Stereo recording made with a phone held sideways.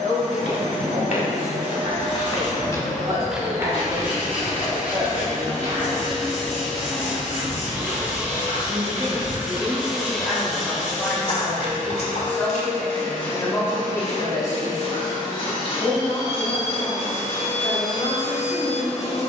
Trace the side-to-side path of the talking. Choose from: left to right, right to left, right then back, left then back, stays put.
right to left.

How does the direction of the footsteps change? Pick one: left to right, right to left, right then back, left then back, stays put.
right then back.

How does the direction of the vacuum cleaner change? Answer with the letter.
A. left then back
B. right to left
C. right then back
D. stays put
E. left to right
C.